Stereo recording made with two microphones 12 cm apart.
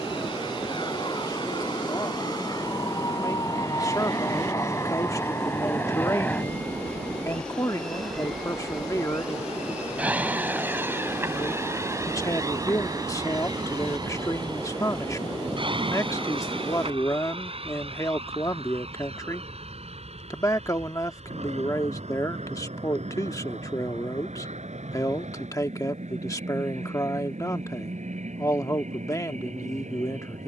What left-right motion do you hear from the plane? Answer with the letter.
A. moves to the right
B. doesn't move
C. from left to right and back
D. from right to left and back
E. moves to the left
A.